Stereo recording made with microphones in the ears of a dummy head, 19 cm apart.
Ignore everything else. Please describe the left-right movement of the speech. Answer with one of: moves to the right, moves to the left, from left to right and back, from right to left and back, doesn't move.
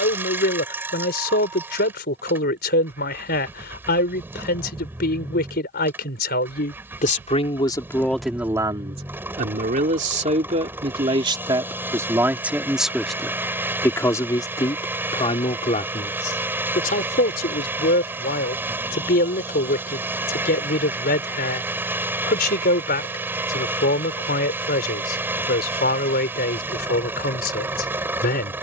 from left to right and back.